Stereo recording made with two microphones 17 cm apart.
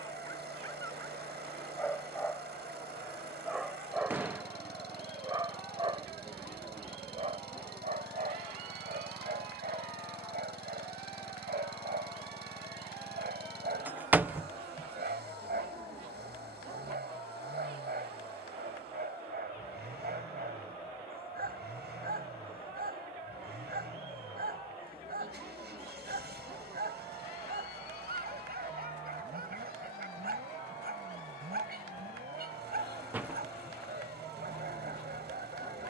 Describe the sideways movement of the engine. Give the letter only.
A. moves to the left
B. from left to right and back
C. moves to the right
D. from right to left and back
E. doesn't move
E.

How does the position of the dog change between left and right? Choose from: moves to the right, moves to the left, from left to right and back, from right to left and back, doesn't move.
moves to the right.